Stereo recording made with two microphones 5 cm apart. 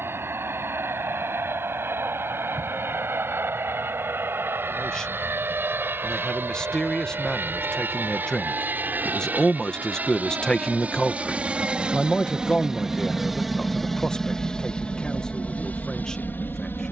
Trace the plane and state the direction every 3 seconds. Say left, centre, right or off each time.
right, right, right, right, centre, left.